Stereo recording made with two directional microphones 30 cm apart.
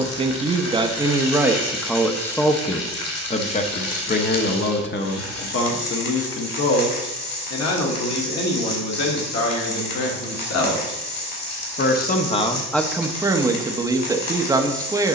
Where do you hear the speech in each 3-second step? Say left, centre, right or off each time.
centre, left, left, left, centre.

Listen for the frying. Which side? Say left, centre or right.
left.